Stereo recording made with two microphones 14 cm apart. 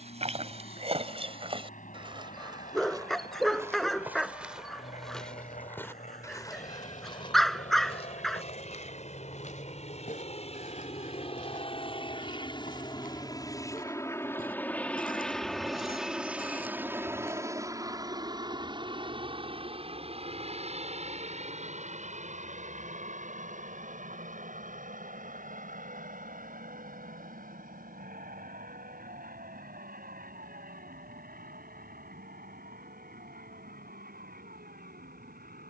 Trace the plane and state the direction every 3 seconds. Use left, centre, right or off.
left, left, left, left, left, centre, right, right, right, right, right, right.